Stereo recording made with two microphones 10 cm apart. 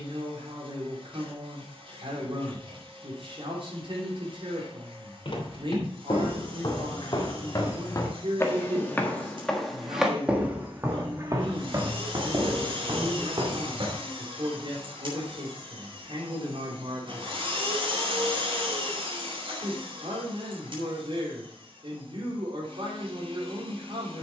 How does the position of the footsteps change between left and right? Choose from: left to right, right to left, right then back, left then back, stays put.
left to right.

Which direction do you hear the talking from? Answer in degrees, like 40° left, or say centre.
60° right.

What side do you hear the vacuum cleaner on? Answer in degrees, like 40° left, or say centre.
60° right.